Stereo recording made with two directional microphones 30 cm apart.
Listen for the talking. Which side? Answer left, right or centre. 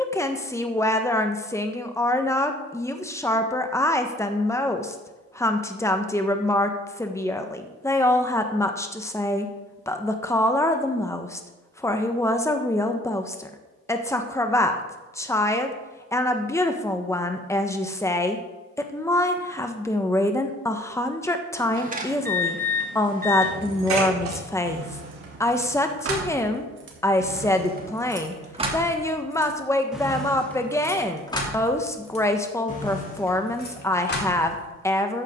centre.